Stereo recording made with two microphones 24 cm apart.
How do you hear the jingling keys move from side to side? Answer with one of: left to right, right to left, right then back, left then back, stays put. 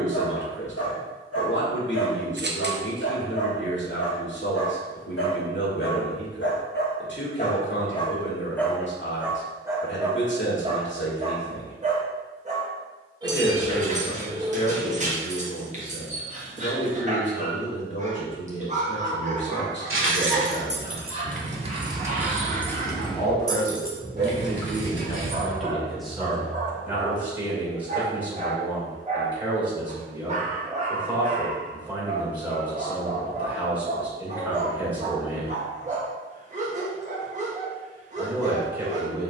right to left.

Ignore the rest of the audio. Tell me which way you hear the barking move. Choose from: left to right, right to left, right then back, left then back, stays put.
left to right.